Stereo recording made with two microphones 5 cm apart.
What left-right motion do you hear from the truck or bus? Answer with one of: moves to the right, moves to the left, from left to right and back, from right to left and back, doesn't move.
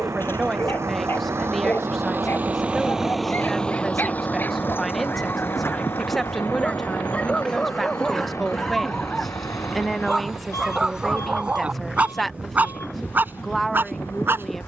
moves to the left.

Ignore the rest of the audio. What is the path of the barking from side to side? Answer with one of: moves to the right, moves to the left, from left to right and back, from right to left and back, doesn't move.
moves to the right.